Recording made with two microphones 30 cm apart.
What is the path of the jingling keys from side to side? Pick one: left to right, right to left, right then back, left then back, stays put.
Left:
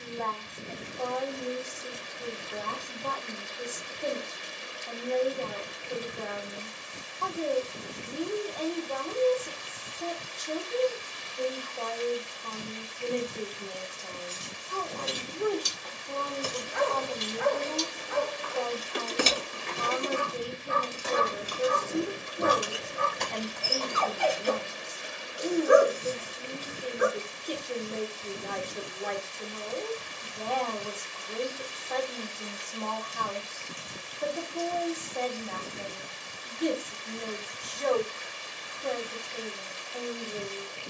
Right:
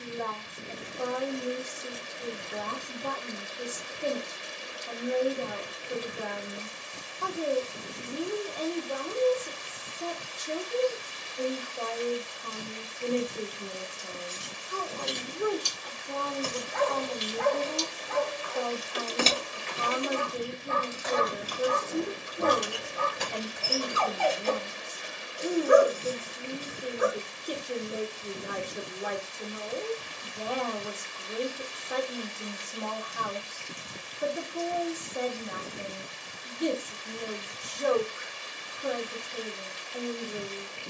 left then back.